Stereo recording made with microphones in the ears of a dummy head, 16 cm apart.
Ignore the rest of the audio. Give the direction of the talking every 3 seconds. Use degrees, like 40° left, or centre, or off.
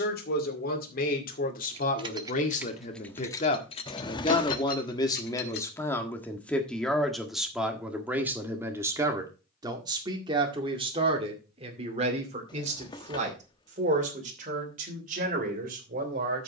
50° left, 30° left, centre, 30° right, 40° right, 50° right.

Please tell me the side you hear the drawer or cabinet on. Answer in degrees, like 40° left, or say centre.
30° left.